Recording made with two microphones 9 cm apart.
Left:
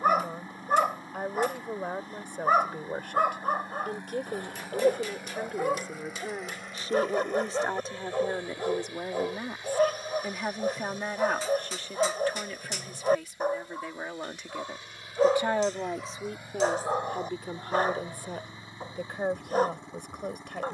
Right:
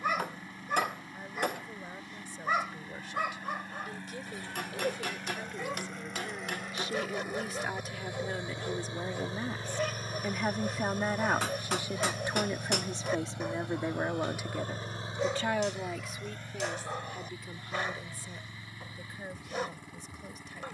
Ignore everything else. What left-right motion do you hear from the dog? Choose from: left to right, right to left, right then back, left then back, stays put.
stays put.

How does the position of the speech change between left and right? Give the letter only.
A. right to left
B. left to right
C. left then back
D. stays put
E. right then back
E.